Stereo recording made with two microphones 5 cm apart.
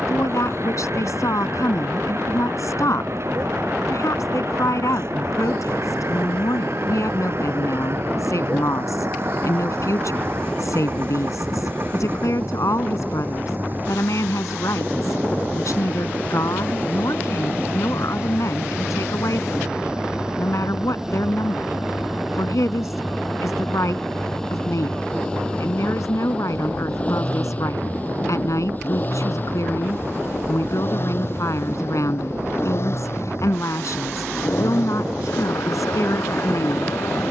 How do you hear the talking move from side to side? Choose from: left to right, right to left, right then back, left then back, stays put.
stays put.